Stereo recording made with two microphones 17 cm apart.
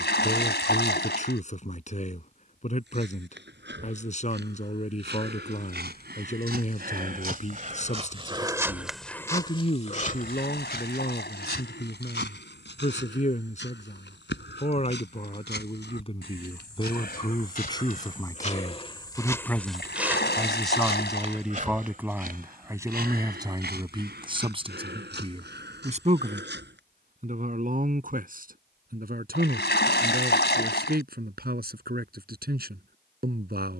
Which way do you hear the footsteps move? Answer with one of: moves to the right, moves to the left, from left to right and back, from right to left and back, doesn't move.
from right to left and back.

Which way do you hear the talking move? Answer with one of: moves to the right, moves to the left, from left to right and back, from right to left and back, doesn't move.
moves to the right.